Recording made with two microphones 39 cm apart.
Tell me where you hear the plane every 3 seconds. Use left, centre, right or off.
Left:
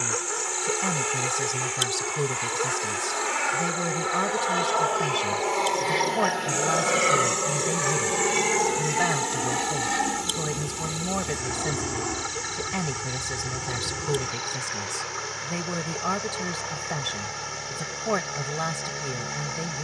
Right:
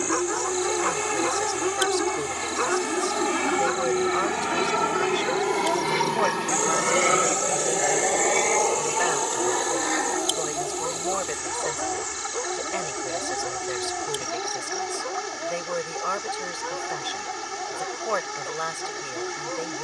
right, right, centre, left, left, left, left.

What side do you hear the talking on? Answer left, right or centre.
left.